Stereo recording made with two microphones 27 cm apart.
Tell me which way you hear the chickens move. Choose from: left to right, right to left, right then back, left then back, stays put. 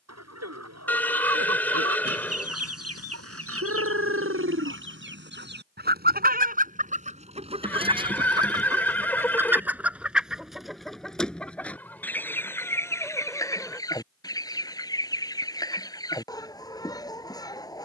right to left.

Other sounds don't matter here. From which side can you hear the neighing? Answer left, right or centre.
centre.